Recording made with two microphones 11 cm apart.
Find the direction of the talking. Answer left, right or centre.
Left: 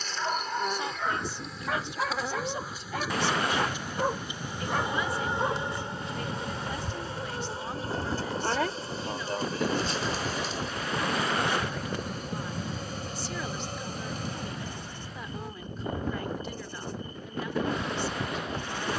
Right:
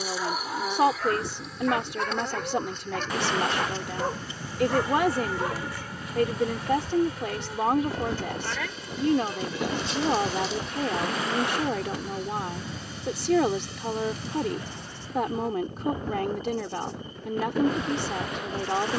right.